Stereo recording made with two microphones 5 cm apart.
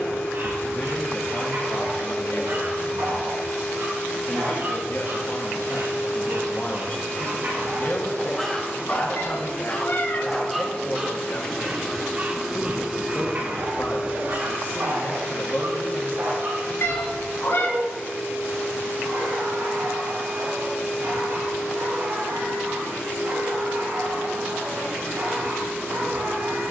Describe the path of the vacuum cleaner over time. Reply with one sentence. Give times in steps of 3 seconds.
In this clip you hear the vacuum cleaner on the left from 0 s and on the right from 12 s.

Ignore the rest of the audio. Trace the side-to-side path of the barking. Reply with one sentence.
You can hear the barking move from right to left and back again.